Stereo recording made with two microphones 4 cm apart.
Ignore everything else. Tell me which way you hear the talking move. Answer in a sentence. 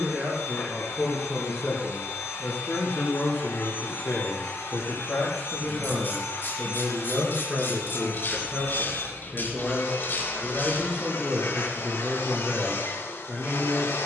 You can hear the talking go left and come back.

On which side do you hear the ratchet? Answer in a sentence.
In this clip you hear the ratchet on the left.